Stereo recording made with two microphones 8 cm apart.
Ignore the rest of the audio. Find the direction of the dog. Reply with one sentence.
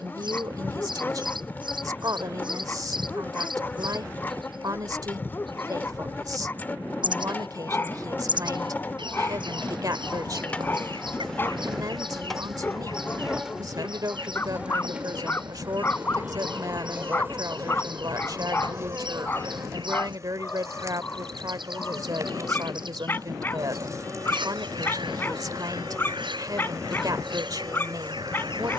In this clip you hear the dog on the left.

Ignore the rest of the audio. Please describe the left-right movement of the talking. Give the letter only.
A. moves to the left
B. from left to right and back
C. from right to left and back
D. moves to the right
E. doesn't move
E.